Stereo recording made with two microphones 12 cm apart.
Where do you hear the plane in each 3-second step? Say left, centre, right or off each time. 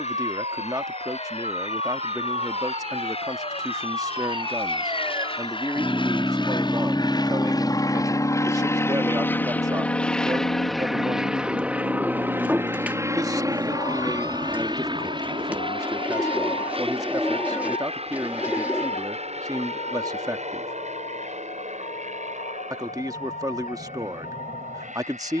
left, left, left, centre, right, right, right, right, right.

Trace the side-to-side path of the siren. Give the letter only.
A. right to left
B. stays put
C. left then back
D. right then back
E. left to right
A.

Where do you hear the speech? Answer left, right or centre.
right.